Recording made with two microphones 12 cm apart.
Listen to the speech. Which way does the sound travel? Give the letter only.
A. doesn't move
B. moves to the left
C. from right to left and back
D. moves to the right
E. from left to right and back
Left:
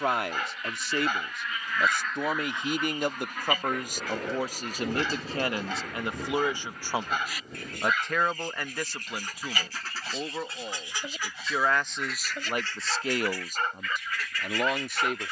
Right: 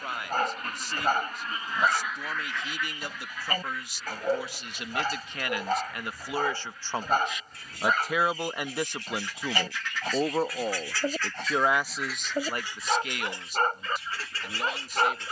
E.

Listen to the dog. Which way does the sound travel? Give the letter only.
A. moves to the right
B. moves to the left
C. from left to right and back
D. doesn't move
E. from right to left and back
D.